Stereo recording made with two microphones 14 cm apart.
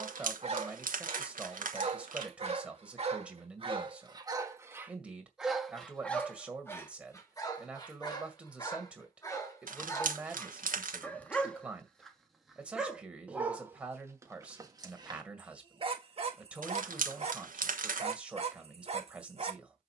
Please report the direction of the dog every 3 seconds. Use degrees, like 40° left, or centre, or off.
40° right, 20° right, 20° left, 20° left, 10° right, 40° right, 40° right.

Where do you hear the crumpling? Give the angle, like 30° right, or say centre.
70° right.